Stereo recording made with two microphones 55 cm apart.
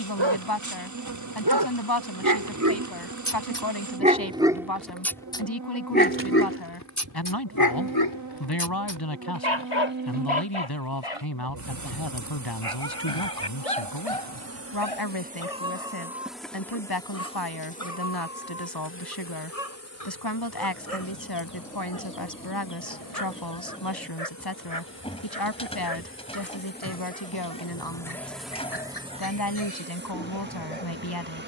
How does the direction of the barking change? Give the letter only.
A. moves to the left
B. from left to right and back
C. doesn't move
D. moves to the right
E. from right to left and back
A.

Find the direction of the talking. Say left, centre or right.
left.